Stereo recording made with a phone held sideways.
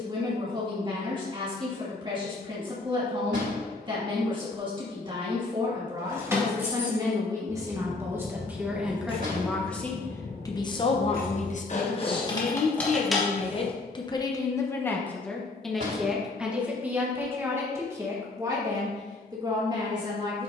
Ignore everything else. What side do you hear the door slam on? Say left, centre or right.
right.